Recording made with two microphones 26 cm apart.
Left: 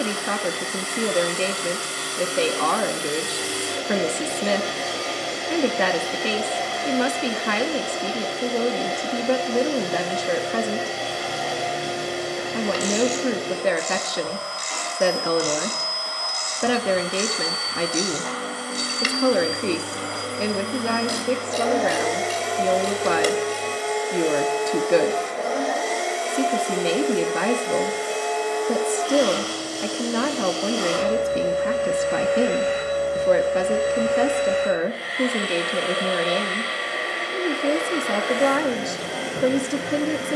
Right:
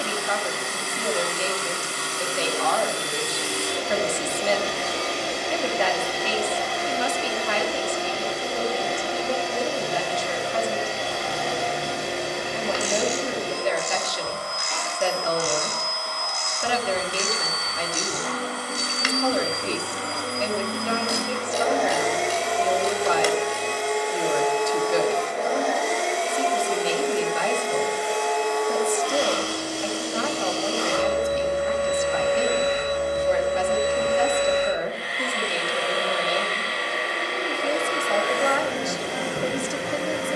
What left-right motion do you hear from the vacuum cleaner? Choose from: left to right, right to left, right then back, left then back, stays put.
stays put.